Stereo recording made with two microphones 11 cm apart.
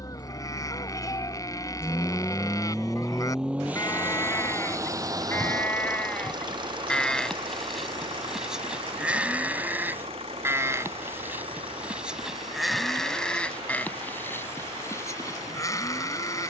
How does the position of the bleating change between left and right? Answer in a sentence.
You can hear the bleating go right and come back.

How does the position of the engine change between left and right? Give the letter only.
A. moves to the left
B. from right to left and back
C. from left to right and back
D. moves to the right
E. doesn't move
D.